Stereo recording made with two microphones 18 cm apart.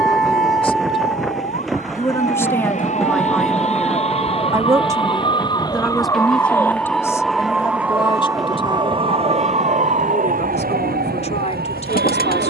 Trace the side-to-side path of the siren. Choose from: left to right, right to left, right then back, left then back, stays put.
left to right.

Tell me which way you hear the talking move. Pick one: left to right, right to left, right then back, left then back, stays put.
right then back.